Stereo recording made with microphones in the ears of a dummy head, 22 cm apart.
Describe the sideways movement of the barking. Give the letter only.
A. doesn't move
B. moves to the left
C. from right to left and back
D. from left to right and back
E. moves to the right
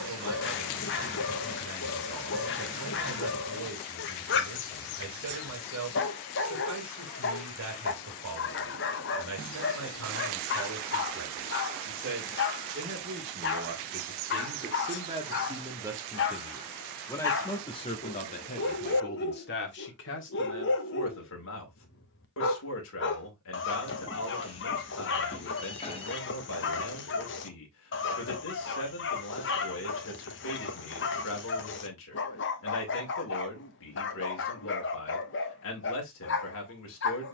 A.